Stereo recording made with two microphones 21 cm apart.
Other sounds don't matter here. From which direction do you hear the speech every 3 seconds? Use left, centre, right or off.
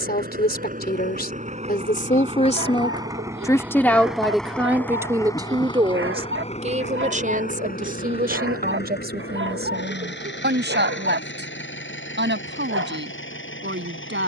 left, centre, right, right, right.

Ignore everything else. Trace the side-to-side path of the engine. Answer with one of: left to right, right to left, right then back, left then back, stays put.
right to left.